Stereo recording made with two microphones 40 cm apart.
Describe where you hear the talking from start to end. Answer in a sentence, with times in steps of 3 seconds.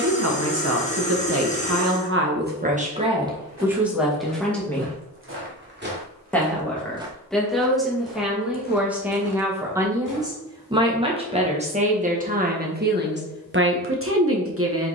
In this clip you hear the talking on the right from 0 s, in the centre from 3 s and on the right from 12 s.